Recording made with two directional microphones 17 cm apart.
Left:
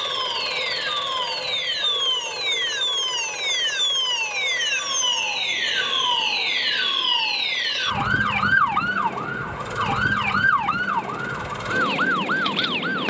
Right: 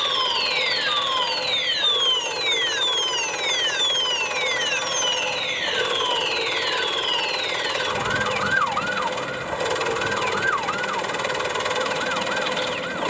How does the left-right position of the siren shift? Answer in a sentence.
You can hear the siren move from right to left.